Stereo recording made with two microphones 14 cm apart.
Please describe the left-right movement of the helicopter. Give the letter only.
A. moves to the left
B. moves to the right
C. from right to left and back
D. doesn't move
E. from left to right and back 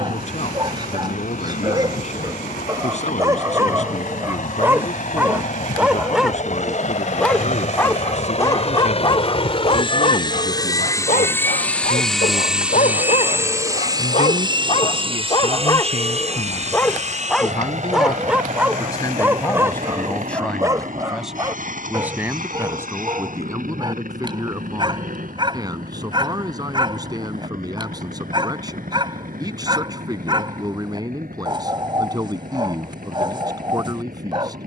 B.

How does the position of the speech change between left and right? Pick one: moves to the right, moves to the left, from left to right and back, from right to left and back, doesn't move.
moves to the right.